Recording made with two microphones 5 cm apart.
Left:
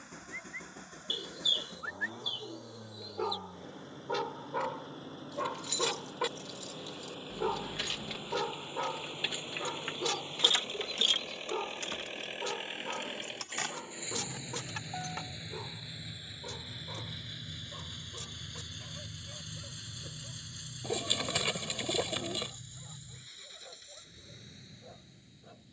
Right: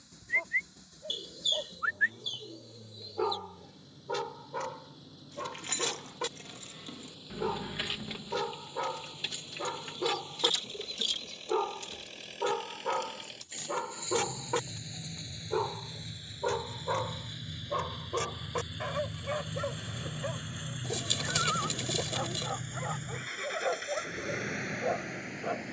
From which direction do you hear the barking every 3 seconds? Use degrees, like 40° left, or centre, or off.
40° right, 10° left, centre, 20° right, 40° right, 50° right, 60° right, 70° right, 70° right.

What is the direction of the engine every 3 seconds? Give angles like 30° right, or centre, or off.
50° left, 50° left, 40° left, 40° left, 30° left, 10° left, 20° right, 50° right, 70° right.